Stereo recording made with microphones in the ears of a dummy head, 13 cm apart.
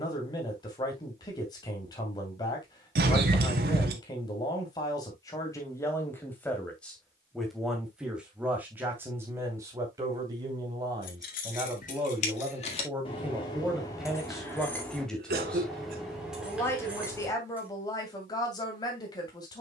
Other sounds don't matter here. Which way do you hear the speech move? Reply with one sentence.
In this clip you hear the speech go right and come back.